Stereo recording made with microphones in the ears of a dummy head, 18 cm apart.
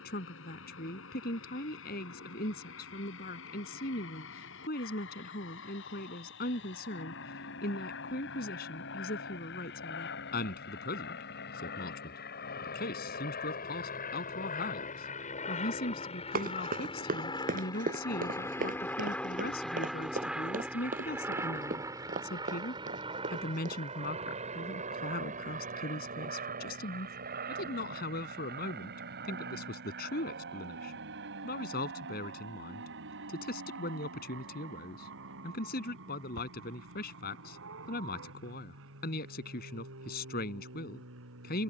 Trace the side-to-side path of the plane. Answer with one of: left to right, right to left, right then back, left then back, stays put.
left to right.